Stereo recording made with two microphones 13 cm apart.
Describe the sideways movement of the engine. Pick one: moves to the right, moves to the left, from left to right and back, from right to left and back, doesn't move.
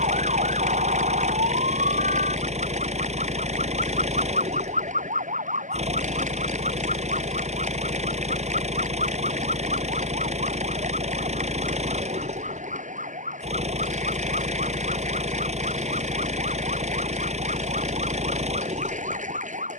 doesn't move.